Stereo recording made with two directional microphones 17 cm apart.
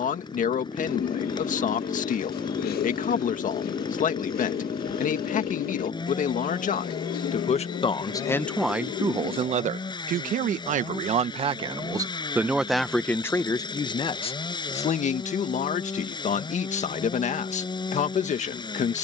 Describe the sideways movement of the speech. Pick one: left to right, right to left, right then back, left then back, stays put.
right then back.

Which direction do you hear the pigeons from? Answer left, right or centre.
left.